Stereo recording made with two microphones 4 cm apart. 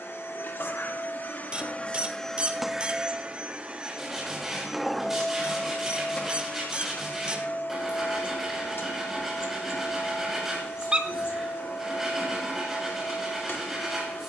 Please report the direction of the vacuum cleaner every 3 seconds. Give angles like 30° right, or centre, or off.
30° left, 10° right, 50° left, 60° left, 60° left.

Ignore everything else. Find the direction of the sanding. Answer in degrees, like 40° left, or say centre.
10° right.